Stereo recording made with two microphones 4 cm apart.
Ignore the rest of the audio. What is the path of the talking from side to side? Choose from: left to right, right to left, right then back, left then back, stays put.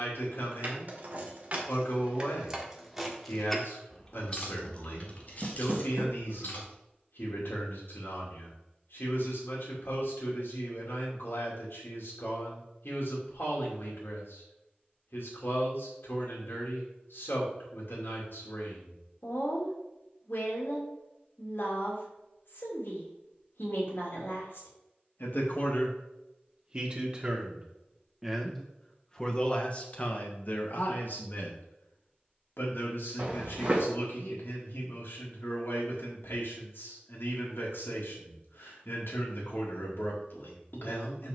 right then back.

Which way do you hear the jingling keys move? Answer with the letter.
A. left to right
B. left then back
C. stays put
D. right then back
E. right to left
E.